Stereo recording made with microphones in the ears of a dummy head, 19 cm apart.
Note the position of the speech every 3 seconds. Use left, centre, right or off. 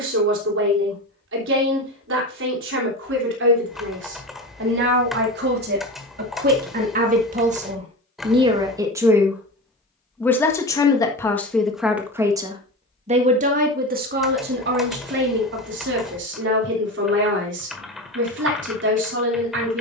right, right, right, centre, right, right, right.